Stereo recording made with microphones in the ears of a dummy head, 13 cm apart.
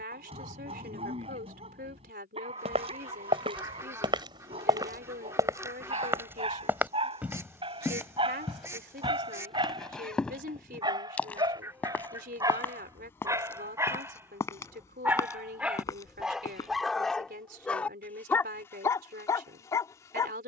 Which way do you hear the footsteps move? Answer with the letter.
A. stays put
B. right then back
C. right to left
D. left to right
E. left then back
C.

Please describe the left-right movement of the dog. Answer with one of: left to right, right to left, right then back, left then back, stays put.
right to left.